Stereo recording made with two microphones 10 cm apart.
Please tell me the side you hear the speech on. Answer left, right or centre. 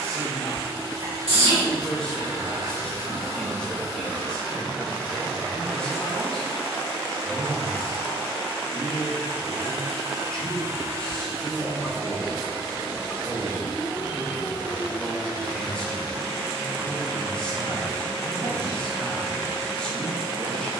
centre.